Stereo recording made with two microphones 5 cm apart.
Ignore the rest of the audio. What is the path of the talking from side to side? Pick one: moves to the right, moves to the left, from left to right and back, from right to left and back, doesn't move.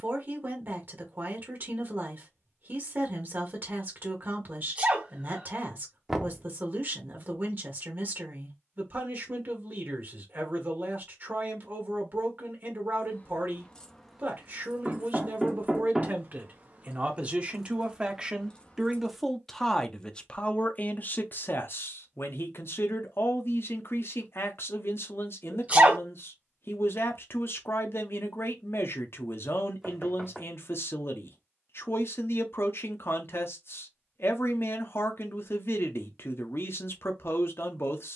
moves to the left.